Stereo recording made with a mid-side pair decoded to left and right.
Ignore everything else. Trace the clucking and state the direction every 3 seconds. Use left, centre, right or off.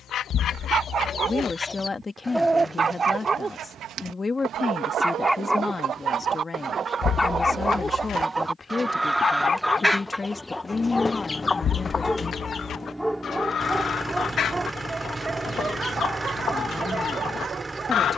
left, right, right, centre, left, left.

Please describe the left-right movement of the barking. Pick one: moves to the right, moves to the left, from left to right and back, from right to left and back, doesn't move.
from right to left and back.